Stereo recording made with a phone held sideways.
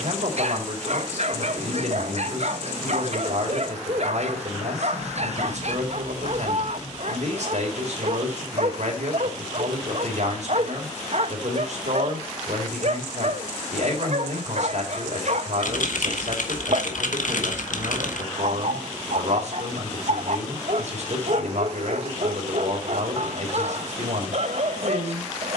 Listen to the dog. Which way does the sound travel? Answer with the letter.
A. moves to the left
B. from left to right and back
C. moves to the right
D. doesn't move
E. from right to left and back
D.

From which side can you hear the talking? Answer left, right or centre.
right.